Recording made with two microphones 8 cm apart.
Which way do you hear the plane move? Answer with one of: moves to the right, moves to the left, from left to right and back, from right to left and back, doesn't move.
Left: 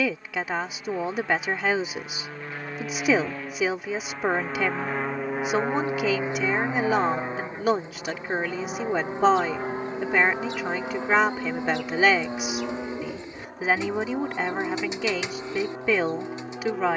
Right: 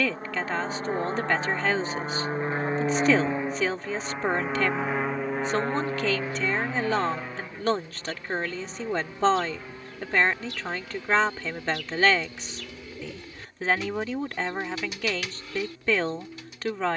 moves to the left.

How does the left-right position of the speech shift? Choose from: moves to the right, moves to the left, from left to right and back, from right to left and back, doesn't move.
doesn't move.